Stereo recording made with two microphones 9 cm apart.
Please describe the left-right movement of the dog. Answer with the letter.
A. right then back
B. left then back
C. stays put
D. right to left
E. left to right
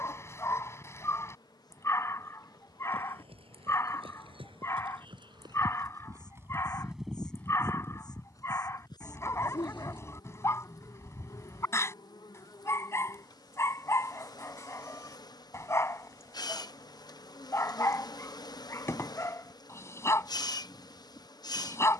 C.